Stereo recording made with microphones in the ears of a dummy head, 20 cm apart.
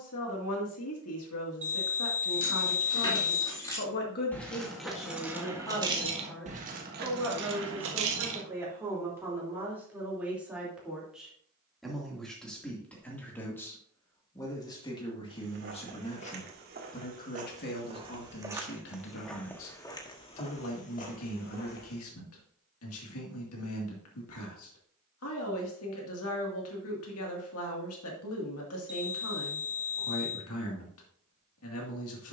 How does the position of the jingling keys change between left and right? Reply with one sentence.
In this clip you hear the jingling keys go from the left side to the right.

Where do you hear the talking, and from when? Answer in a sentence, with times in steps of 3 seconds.
In this clip you hear the talking on the left from 0 s, in the centre from 6 s and on the left from 15 s.